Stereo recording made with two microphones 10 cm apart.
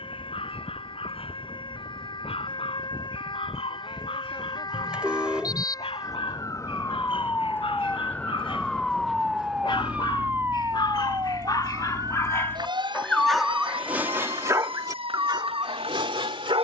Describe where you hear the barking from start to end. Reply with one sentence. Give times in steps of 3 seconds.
In this clip you hear the barking on the left from 0 s, in the centre from 12 s and on the right from 15 s.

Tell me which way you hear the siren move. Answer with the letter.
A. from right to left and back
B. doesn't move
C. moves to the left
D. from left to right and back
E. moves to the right
E.